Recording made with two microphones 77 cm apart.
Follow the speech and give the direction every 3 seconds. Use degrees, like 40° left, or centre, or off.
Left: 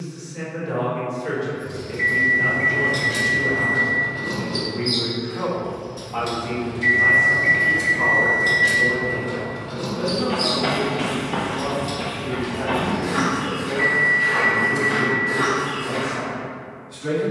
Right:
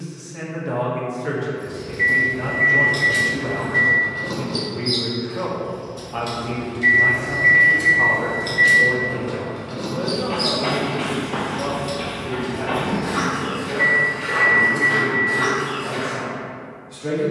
70° right, 70° right, 30° right, 10° right, 10° left, 10° left.